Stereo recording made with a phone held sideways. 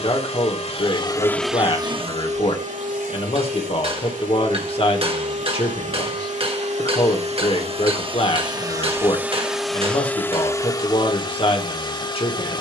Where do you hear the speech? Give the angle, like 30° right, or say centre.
40° left.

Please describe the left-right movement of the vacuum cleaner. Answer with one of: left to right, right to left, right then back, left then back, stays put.
right then back.